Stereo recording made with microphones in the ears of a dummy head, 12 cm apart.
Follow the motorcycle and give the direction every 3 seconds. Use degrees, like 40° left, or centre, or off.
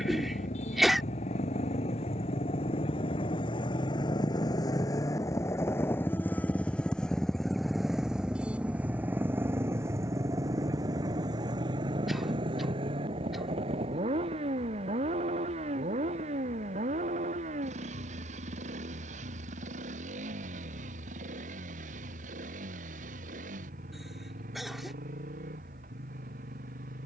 50° left, 30° left, centre, 30° right, 40° right, 50° right, 60° right, 60° right, 70° right.